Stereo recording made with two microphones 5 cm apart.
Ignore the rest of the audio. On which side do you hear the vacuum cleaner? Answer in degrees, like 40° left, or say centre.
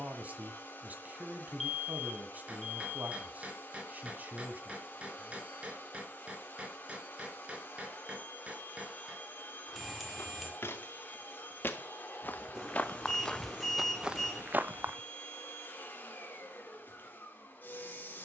40° left.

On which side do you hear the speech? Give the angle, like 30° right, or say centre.
40° right.